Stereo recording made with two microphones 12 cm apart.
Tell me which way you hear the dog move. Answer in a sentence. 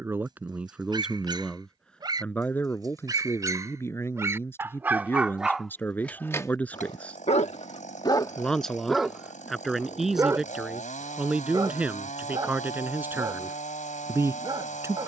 You can hear the dog go left and come back.